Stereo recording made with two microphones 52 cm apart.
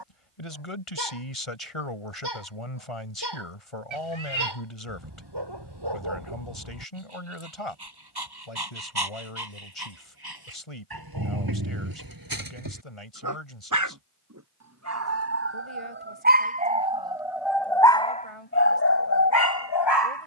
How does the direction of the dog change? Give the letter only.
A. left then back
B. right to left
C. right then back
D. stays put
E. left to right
B.